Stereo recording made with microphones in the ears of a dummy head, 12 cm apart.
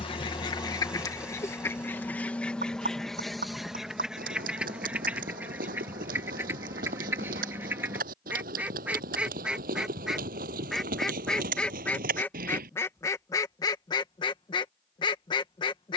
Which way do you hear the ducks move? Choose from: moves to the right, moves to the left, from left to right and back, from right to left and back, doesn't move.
from left to right and back.